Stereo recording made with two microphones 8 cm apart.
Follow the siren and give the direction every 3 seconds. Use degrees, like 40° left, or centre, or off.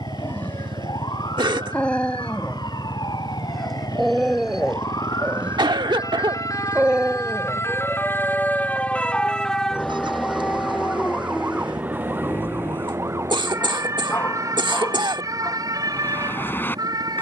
70° left, 60° left, 30° left, 10° right, 40° right, 50° right.